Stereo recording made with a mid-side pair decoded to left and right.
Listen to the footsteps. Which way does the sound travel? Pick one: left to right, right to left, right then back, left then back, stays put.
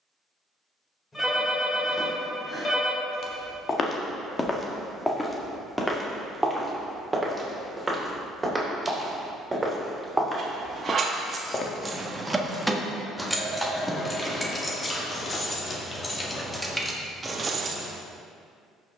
right then back.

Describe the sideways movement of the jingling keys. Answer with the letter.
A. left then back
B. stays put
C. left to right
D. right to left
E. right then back
A.